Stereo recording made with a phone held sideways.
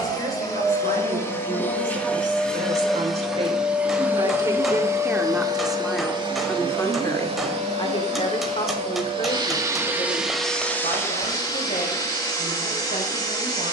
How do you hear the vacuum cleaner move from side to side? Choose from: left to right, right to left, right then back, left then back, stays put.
right then back.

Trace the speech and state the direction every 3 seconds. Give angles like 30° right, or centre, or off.
50° right, 20° right, 30° left, 50° left, 60° left.